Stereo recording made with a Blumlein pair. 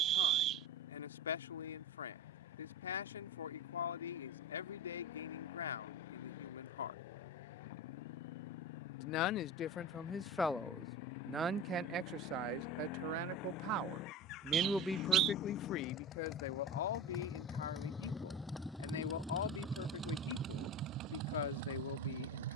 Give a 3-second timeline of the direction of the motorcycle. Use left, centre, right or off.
left, left, left, left, left, left, centre, right.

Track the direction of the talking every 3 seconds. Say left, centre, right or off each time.
left, left, left, centre, right, left, left, left.